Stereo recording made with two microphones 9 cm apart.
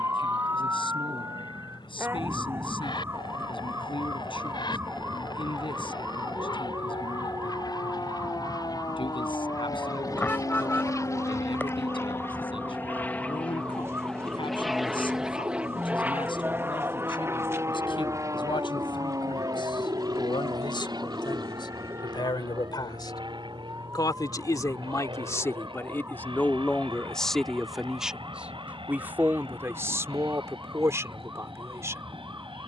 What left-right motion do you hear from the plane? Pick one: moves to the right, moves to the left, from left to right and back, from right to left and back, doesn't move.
moves to the right.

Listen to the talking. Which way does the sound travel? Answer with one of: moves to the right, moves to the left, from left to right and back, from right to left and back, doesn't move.
moves to the right.